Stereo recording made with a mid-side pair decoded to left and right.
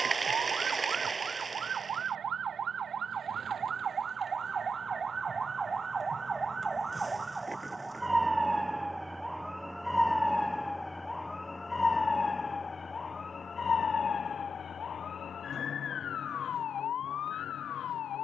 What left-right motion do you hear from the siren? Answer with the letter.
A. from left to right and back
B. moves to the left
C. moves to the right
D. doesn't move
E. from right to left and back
B.